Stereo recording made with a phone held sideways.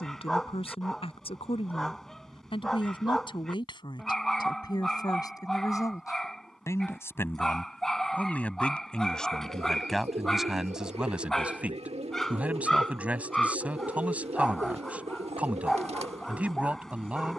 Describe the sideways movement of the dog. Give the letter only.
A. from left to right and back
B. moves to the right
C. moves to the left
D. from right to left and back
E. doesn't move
E.